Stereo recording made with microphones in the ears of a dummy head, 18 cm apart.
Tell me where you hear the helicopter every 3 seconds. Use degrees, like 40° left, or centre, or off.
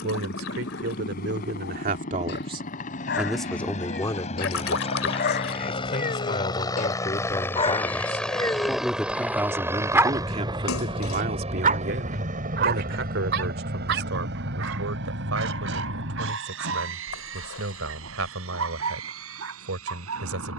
50° left, 40° left, 10° left, 20° right, 50° right, 60° right, 70° right.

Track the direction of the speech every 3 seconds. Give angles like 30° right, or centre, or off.
50° right, 20° left, 20° left, 30° right, 70° right, 80° right, 80° right.